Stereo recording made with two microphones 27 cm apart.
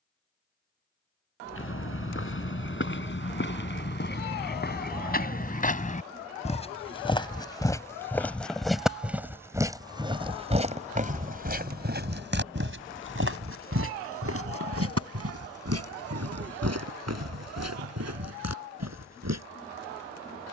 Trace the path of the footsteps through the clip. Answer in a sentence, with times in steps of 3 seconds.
You can hear the footsteps on the left from 0 s, in the centre from 6 s and on the right from 9 s.